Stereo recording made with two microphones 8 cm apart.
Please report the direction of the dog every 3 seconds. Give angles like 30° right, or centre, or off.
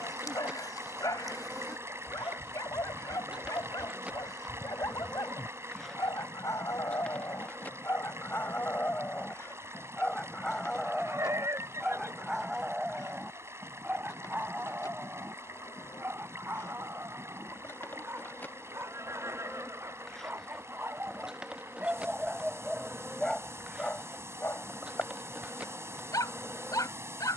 50° left, 50° left, 40° left, 10° left, 10° right, 30° right, 30° right, 10° right, 40° left.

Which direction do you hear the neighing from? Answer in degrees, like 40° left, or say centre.
40° right.